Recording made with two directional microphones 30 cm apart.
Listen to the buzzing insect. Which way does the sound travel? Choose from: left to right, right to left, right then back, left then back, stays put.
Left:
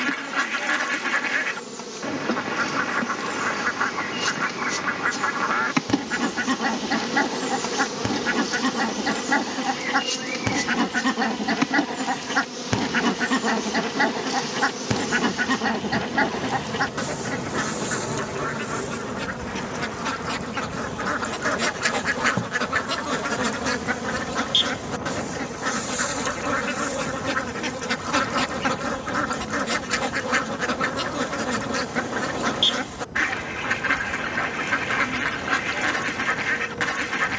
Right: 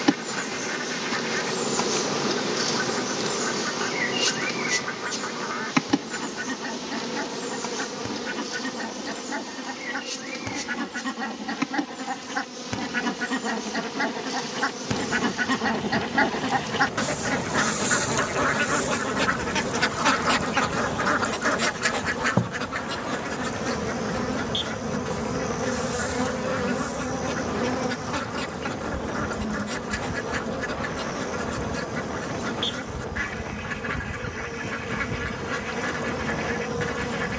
left then back.